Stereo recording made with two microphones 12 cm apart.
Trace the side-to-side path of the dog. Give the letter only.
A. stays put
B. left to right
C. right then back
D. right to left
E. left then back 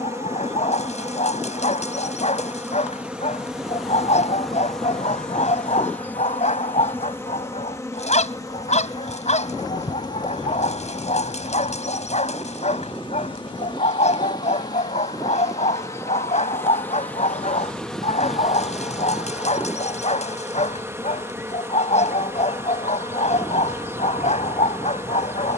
A.